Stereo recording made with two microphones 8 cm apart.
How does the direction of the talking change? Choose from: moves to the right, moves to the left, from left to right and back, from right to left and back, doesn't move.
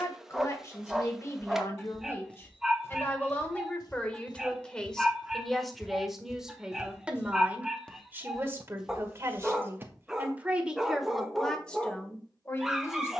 from left to right and back.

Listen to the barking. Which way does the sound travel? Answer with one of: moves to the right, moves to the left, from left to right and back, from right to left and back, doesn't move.
doesn't move.